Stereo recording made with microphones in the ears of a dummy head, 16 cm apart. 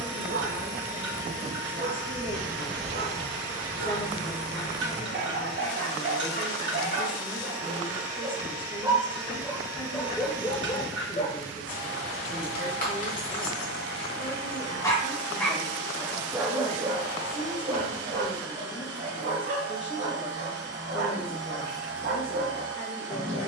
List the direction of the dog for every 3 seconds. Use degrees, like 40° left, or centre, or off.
60° right, 60° right, 50° right, 10° left, 40° left, 30° right, 60° right, 60° right.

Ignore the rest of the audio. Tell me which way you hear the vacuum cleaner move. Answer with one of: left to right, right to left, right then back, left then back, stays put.
stays put.